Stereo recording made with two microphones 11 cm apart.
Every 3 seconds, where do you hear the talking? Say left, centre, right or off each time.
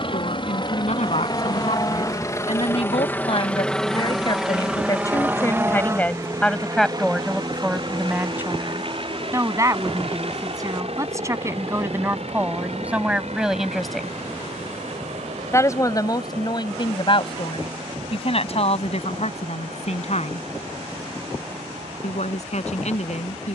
left, left, centre, right, centre, left, left, left.